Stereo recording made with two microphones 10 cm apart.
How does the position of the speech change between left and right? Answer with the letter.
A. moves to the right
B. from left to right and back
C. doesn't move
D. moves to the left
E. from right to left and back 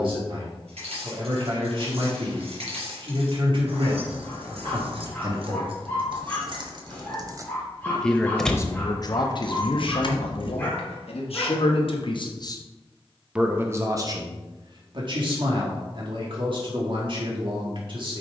E.